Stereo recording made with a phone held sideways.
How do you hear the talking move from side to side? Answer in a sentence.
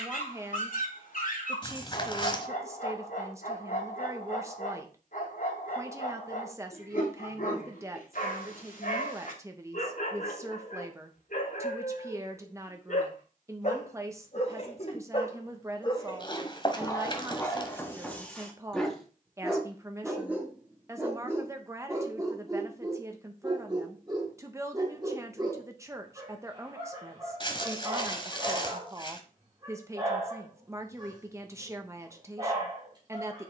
In this clip you hear the talking stay in one place.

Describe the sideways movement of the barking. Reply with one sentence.
In this clip you hear the barking move from left to right.